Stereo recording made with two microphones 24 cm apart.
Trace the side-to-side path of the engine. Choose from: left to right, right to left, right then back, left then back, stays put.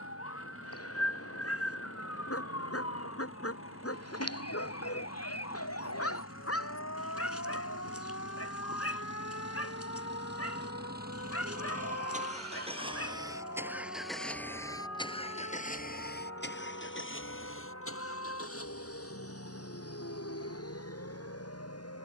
right to left.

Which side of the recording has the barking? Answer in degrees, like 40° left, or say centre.
80° left.